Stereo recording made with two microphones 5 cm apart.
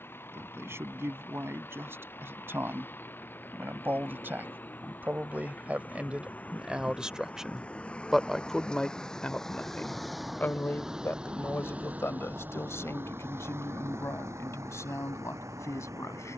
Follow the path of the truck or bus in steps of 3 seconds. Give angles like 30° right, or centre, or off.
50° left, 40° left, 30° left, 10° right, 50° right, 80° right.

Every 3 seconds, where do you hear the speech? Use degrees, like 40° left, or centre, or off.
50° right, 40° right, 10° right, 40° left, 70° left, 70° left.